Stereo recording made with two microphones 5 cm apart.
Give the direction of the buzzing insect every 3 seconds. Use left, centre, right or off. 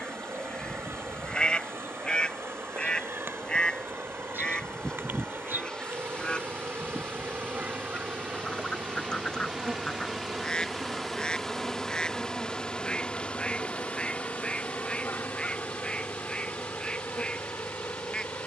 right, right, right, centre, left, left.